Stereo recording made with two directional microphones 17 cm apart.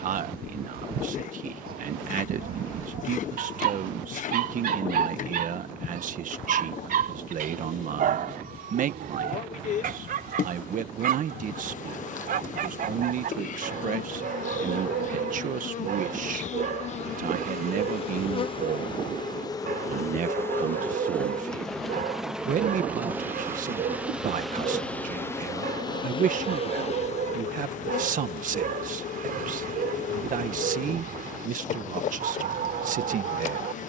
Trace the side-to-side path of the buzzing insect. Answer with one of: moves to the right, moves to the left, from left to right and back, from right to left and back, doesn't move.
from left to right and back.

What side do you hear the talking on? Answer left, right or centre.
right.